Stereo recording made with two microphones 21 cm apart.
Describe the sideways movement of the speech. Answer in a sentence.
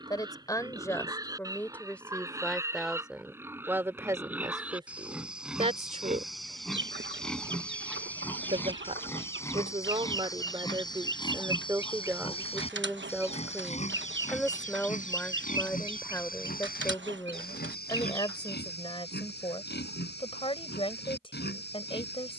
In this clip you hear the speech go right and come back.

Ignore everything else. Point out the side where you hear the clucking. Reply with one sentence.
You can hear the clucking on the right.